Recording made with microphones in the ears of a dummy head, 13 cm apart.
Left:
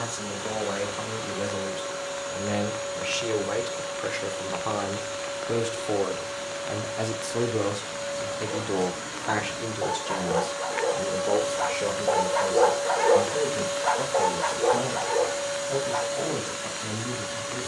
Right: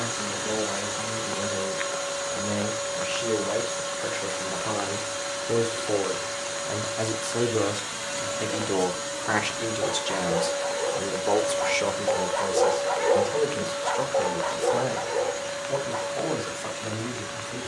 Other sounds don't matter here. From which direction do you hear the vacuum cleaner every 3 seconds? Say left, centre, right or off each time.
right, right, right, centre, left, left.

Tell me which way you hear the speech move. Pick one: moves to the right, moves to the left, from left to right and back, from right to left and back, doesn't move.
moves to the right.